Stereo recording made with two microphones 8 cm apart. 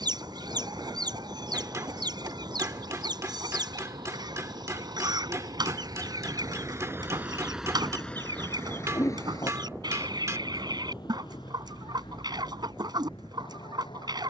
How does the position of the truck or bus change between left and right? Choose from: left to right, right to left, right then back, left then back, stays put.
right to left.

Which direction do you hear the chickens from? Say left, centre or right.
right.